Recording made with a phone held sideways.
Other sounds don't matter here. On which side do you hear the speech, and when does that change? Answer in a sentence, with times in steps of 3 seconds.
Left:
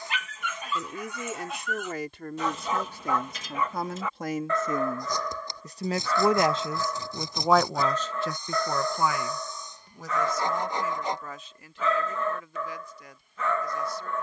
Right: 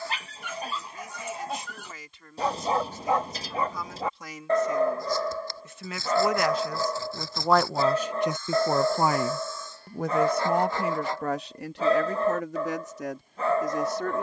You can hear the speech on the left from 0 s, in the centre from 6 s and on the right from 9 s.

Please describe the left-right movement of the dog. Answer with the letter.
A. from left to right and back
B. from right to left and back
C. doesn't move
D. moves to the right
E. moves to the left
C.